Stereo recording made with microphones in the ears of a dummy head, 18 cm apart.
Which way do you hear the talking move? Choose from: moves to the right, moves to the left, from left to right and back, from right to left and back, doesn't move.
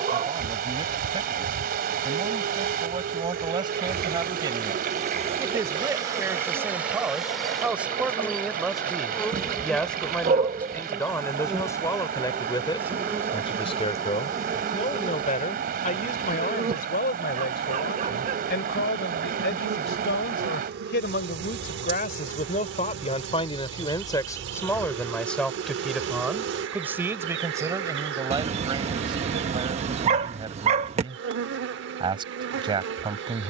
from right to left and back.